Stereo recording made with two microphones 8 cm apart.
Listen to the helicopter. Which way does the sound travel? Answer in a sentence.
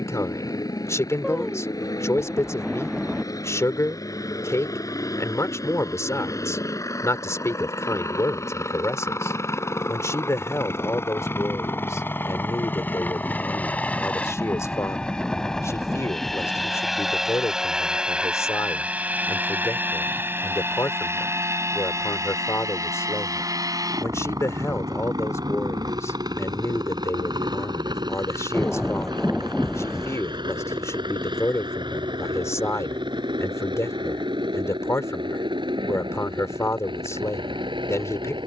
In this clip you hear the helicopter move to the right.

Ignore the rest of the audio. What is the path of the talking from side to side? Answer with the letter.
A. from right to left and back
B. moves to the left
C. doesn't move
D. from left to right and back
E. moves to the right
C.